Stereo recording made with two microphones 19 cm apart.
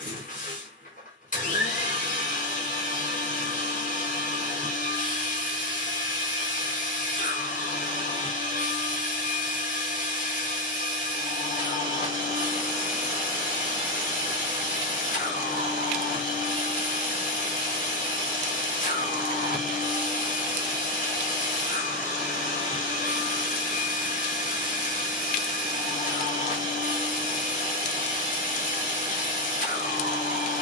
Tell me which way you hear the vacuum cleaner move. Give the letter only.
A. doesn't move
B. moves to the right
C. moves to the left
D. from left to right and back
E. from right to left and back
A.